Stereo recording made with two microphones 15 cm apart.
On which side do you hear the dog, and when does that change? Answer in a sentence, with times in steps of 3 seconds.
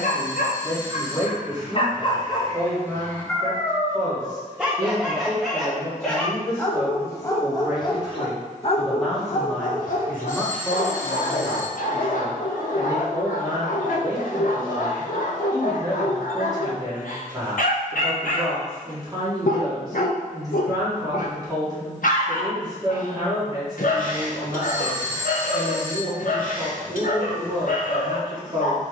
You can hear the dog on the left from 0 s, in the centre from 3 s and on the left from 6 s.